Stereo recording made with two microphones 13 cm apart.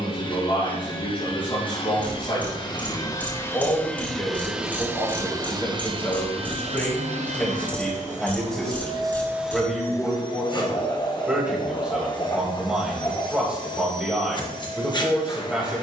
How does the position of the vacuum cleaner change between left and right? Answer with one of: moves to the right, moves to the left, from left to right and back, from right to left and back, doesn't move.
from left to right and back.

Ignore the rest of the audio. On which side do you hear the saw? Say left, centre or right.
left.